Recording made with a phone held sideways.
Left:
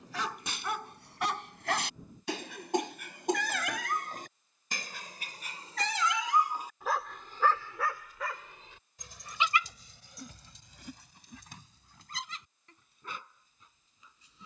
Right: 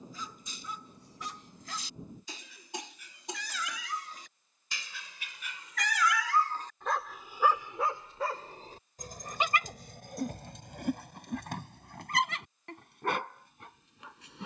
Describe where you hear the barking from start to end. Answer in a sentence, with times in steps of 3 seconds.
In this clip you hear the barking on the left from 0 s, in the centre from 6 s and on the right from 9 s.